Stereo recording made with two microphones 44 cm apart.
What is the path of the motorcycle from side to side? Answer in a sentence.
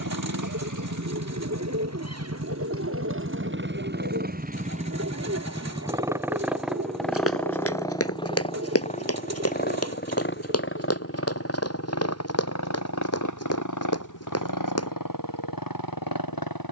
You can hear the motorcycle move from right to left.